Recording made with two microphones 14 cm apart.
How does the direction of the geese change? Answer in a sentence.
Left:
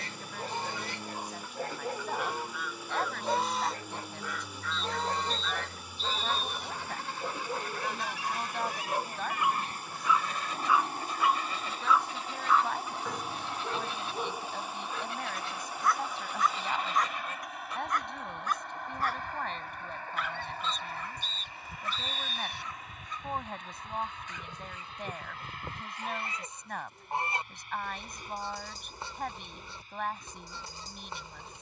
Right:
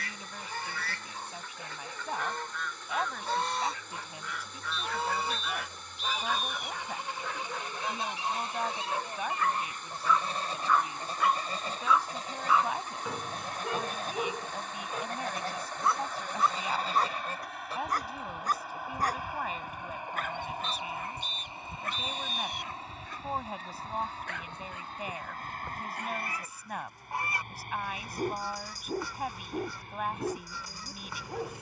You can hear the geese go right and come back.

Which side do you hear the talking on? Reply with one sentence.
In this clip you hear the talking in the centre.